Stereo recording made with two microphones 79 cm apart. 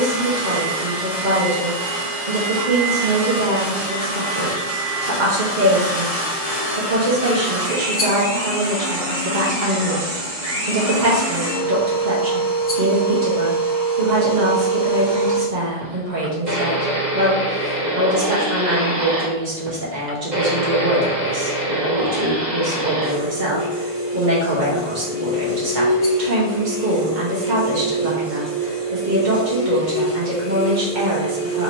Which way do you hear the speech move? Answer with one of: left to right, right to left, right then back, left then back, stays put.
stays put.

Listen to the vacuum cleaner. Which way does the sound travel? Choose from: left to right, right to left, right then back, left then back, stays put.
right to left.